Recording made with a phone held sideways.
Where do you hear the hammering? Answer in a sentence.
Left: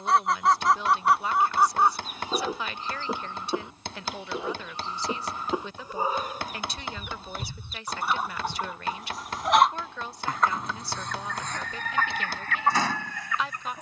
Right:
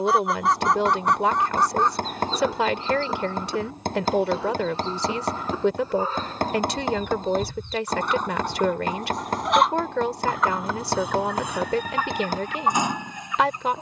You can hear the hammering on the right.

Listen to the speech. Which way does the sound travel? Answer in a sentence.
You can hear the speech stay in one place.